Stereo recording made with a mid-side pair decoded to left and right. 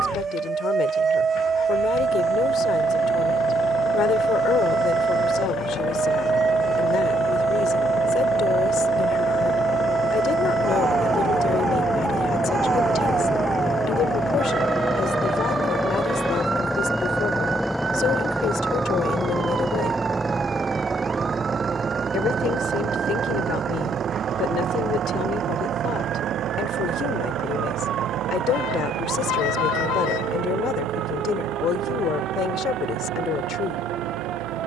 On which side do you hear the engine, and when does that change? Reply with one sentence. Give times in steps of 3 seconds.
In this clip you hear the engine on the left from 0 s, in the centre from 15 s and on the right from 21 s.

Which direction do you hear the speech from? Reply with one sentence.
In this clip you hear the speech on the left.